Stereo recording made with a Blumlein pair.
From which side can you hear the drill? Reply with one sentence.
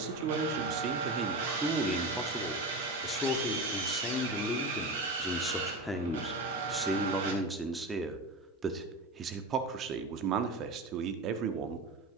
You can hear the drill on the right.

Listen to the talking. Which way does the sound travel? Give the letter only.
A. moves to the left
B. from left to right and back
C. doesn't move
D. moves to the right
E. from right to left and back
E.